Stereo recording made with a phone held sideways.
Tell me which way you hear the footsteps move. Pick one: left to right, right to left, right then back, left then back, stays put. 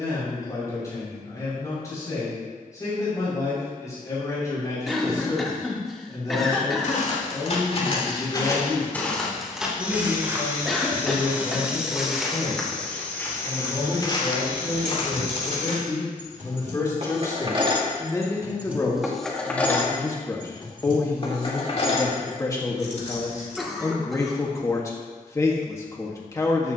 right then back.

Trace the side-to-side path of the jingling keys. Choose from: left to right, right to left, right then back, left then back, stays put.
right to left.